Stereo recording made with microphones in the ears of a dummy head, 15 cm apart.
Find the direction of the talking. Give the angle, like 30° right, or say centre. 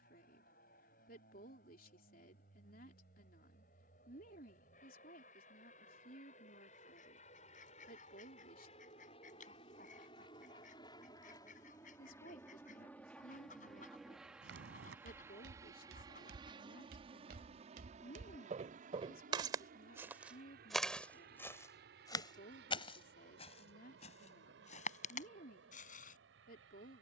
60° left.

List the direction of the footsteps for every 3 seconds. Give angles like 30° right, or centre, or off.
off, off, off, off, 80° right, 70° right, 30° right, 30° left, 50° left.